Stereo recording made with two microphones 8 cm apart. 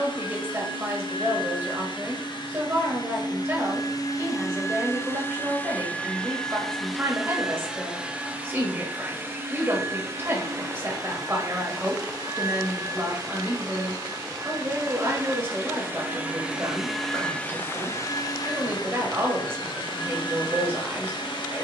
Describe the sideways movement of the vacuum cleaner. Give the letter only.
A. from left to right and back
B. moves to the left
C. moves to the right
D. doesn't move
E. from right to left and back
A.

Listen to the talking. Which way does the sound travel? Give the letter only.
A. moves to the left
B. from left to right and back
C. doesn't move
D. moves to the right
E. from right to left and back
C.